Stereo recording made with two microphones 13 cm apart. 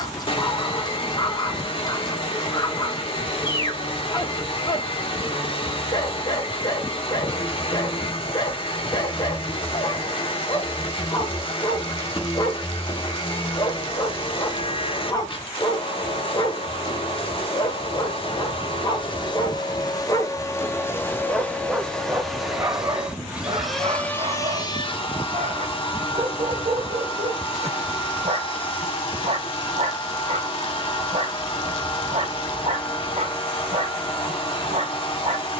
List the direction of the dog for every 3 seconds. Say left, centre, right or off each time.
left, left, left, left, left, left, left, right, right, right, right, right.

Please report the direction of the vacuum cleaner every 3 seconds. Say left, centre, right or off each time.
left, left, left, left, left, left, left, centre, left, left, left, left.